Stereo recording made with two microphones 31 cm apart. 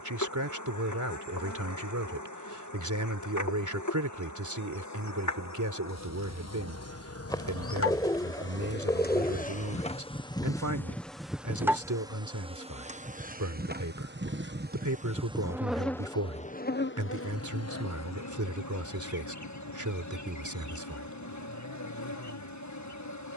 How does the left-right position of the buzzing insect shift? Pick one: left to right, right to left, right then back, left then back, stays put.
right then back.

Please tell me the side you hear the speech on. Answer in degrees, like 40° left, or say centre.
70° right.